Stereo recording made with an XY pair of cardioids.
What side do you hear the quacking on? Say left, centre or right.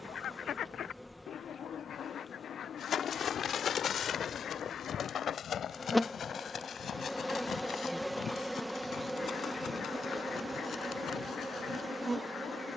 left.